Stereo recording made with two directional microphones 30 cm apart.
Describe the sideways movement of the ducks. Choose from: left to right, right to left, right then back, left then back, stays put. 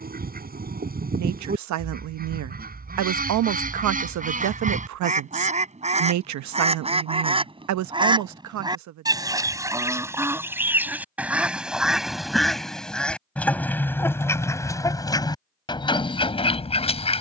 right to left.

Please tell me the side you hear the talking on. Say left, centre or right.
right.